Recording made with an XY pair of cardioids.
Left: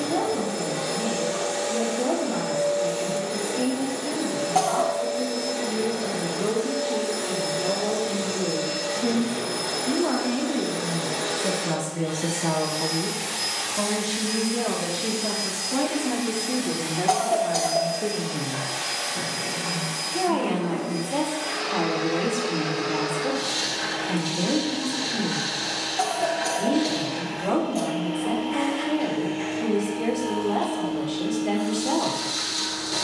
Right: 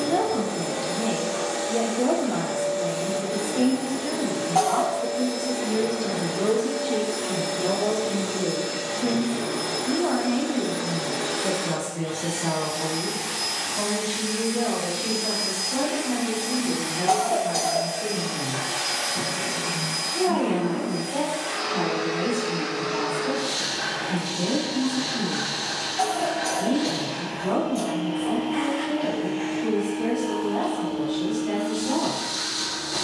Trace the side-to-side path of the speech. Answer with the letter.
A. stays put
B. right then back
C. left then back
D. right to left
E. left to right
D.